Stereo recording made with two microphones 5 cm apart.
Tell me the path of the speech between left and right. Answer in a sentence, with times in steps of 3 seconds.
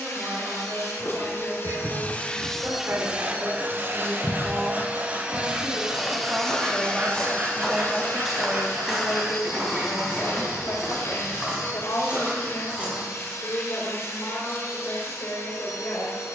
In this clip you hear the speech on the right from 0 s, in the centre from 6 s and on the left from 9 s.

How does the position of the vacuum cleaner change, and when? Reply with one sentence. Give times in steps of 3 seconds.
In this clip you hear the vacuum cleaner on the left from 0 s, on the right from 3 s and on the left from 6 s.